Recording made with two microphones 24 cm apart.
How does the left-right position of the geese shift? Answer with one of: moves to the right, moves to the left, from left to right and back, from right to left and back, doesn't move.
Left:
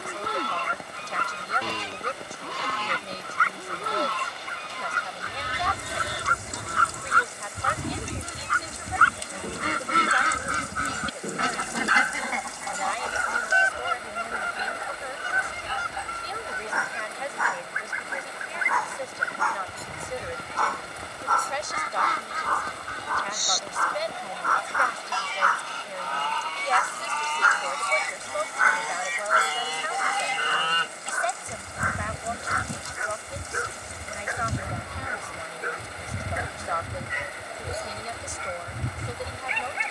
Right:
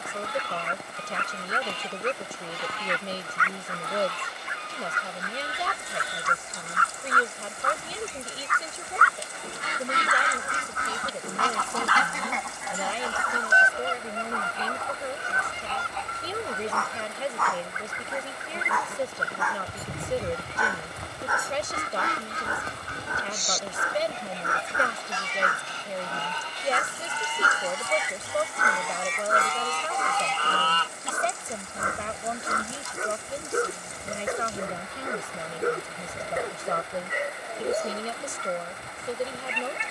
from left to right and back.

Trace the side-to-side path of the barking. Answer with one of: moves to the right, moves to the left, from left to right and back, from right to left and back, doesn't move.
moves to the right.